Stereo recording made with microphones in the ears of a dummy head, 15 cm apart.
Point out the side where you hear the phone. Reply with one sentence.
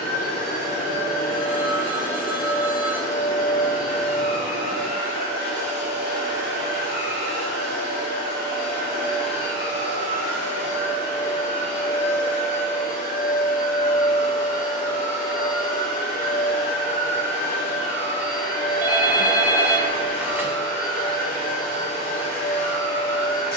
In this clip you hear the phone in the centre.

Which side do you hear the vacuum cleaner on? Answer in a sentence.
You can hear the vacuum cleaner on the left.